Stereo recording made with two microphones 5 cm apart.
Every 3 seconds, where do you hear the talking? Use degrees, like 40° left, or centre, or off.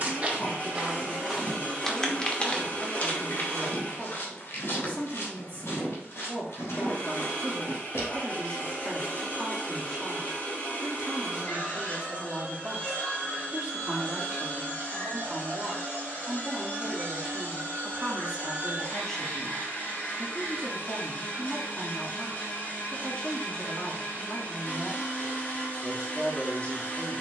40° left, 40° left, 30° left, centre, 20° right, 10° right, 20° left, 30° left, 30° left.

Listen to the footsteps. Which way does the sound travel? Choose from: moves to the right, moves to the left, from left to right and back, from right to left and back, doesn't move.
moves to the left.